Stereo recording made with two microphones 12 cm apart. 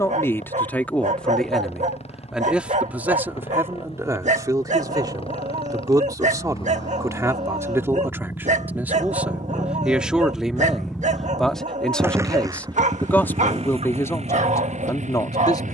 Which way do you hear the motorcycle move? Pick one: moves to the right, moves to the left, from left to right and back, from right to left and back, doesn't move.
moves to the right.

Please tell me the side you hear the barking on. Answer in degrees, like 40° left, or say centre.
70° right.